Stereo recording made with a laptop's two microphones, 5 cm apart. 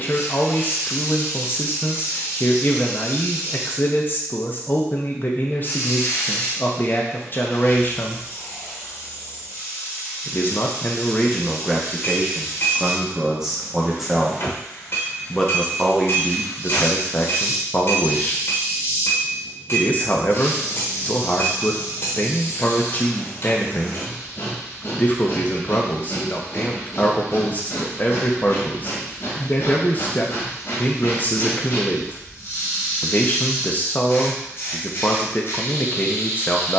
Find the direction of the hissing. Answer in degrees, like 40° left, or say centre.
50° left.